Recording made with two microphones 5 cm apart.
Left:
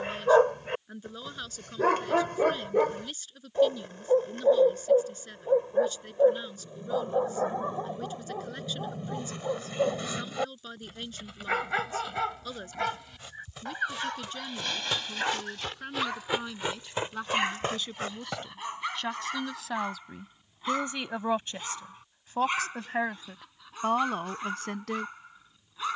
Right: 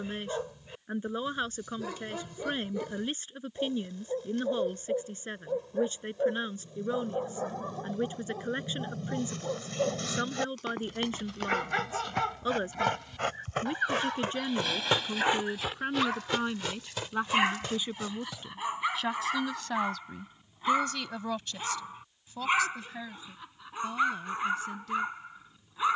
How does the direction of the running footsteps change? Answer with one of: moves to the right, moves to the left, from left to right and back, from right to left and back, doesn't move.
moves to the left.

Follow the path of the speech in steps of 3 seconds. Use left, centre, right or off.
right, right, right, right, right, right, centre, left, left.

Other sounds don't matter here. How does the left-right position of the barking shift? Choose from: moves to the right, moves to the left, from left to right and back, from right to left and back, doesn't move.
moves to the right.